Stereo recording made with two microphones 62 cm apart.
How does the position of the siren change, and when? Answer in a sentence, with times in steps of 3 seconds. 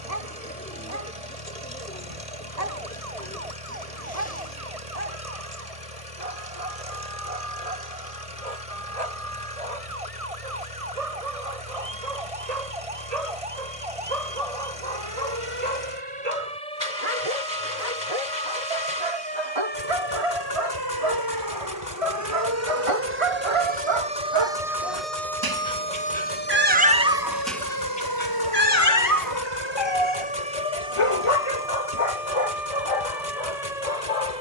You can hear the siren on the right from 0 s, in the centre from 24 s and on the left from 27 s.